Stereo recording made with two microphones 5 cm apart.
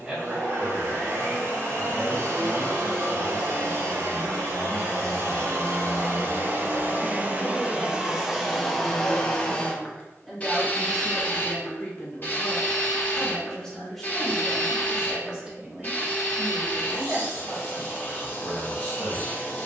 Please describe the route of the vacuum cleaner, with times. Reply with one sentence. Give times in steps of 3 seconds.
In this clip you hear the vacuum cleaner on the right from 0 s and on the left from 9 s.